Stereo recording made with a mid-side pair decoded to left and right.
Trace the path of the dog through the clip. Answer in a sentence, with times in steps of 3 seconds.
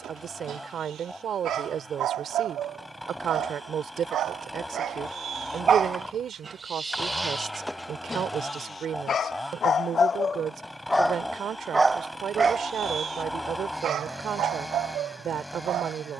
You can hear the dog on the right from 0 s, in the centre from 6 s, on the left from 9 s and on the right from 12 s.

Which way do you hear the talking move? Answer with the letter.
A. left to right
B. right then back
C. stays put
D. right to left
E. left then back
C.